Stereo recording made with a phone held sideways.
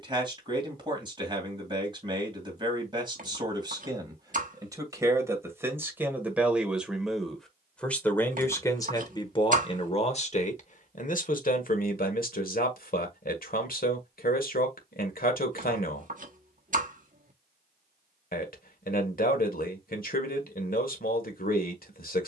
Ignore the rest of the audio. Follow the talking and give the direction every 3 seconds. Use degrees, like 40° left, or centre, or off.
30° right, 20° right, centre, 40° left, 60° left, 60° left, 60° left, 60° left.